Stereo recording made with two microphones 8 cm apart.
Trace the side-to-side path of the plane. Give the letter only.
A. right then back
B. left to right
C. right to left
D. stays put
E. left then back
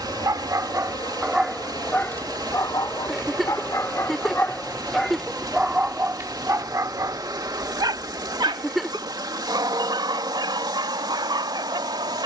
B.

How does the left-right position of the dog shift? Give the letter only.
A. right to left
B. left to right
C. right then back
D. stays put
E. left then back
E.